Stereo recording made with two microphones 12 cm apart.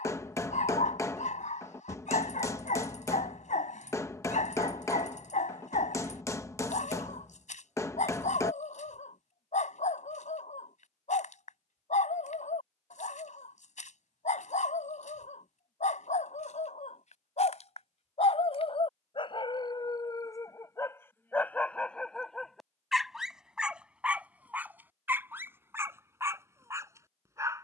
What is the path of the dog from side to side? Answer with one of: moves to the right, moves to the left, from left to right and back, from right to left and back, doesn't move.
moves to the right.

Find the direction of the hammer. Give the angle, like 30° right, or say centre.
20° left.